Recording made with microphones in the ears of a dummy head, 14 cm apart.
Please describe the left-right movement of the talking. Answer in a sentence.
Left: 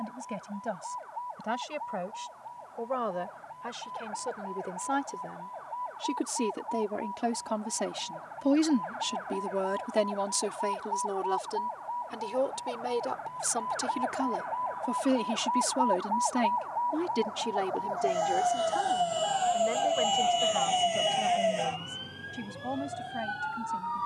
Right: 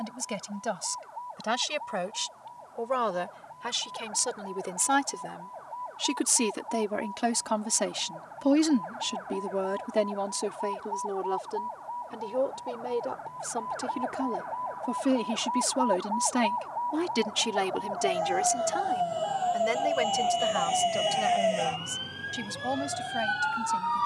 You can hear the talking go left and come back.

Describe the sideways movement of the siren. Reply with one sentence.
You can hear the siren move from left to right.